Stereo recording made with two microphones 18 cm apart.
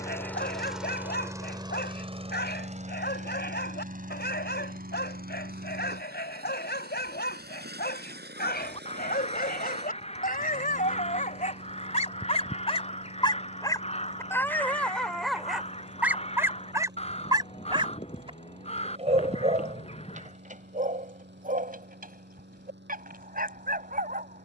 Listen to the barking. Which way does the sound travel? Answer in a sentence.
You can hear the barking move to the right.